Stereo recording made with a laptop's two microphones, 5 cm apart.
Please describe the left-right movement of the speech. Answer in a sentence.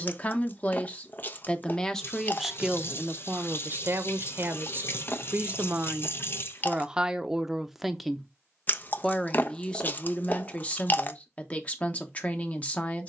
In this clip you hear the speech move from left to right and back again.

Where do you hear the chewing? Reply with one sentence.
In this clip you hear the chewing on the left.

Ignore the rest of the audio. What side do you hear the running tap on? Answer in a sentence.
In this clip you hear the running tap on the left.